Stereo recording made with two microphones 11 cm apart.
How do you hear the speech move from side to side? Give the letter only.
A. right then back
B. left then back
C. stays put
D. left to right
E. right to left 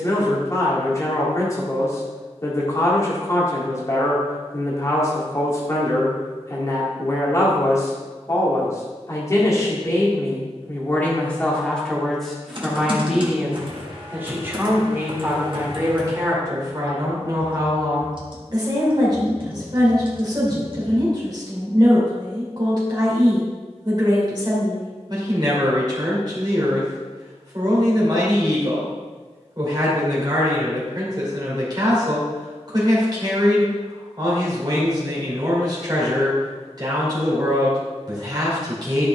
D.